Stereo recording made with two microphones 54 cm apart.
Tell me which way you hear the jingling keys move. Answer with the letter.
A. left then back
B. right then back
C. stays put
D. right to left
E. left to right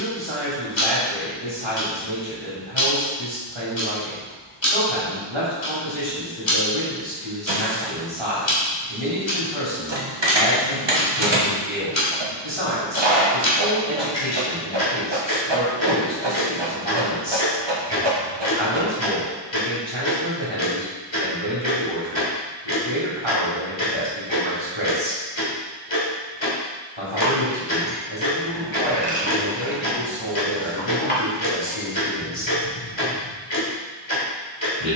D.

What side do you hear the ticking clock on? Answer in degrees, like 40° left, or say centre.
50° left.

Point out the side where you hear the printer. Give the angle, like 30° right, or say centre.
50° right.